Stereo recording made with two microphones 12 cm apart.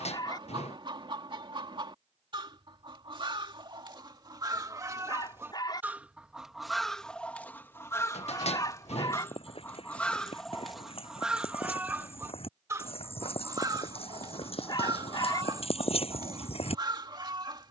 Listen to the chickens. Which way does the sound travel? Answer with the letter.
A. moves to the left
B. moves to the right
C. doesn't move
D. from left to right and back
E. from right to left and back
E.